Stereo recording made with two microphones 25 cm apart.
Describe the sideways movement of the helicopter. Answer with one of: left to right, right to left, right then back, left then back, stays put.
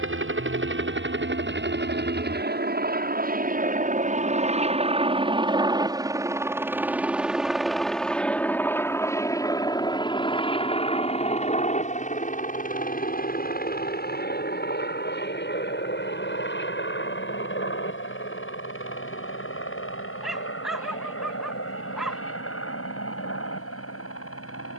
right to left.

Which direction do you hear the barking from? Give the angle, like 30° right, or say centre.
centre.